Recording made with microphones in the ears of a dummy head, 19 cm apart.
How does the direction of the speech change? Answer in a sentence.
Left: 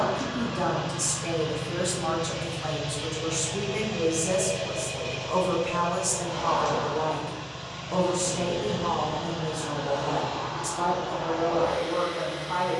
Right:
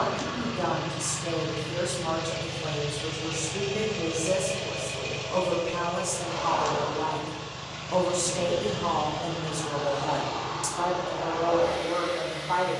In this clip you hear the speech move to the right.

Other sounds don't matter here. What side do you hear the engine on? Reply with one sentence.
You can hear the engine on the right.